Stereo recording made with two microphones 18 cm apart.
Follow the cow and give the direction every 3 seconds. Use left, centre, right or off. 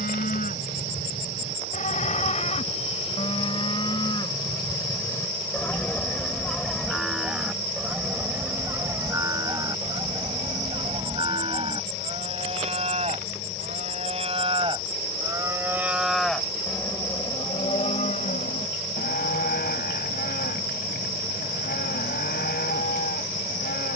left, left, centre, right, right, centre, left, left.